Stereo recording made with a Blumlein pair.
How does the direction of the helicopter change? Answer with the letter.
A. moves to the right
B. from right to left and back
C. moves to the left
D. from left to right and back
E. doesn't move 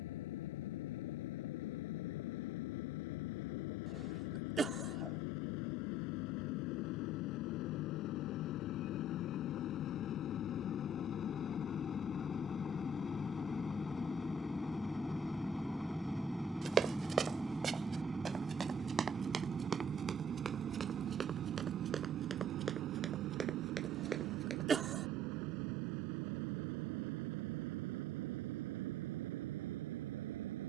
A.